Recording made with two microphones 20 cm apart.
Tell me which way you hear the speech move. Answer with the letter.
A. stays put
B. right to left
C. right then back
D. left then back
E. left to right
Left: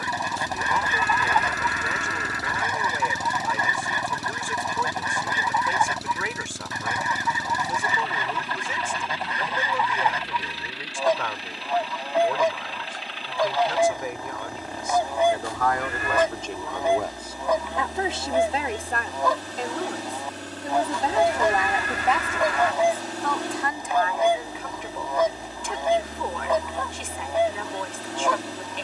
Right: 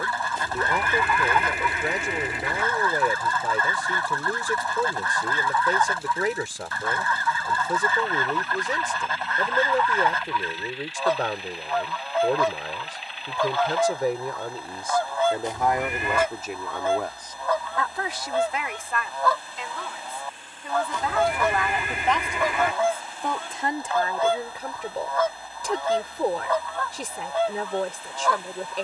D.